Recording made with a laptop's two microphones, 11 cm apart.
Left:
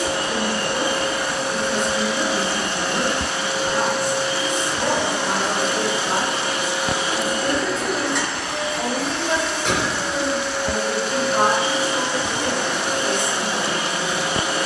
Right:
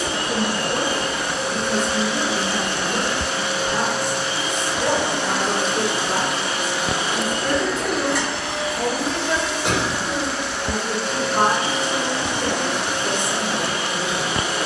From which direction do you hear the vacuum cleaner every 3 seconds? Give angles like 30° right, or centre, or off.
60° left, 40° left, centre, centre, 50° left.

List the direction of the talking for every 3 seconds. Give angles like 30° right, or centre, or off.
30° right, 20° left, 40° left, 20° left, 20° right.